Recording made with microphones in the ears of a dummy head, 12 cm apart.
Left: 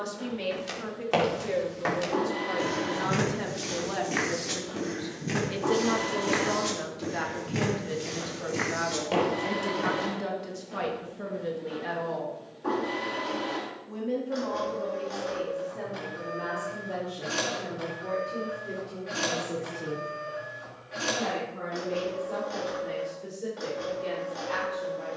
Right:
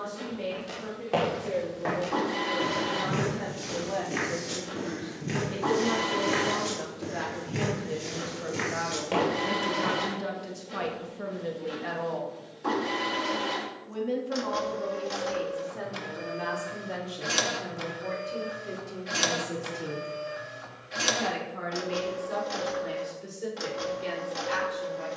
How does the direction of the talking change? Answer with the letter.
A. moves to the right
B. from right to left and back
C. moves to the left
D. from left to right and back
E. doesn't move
A.